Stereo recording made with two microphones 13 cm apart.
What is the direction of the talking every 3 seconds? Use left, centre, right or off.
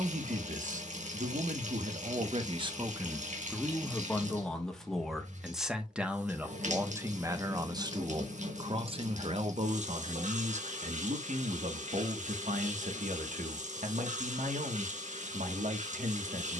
right, centre, right, right, right, right.